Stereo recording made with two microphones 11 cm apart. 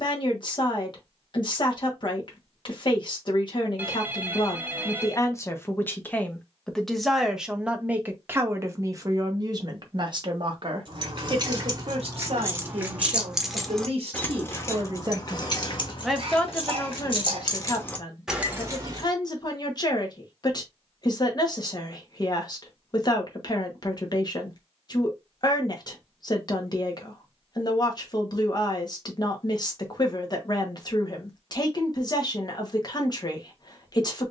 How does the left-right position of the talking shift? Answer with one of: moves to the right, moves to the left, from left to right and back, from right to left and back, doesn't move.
from left to right and back.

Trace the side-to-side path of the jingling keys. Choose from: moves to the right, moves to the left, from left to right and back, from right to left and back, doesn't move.
from right to left and back.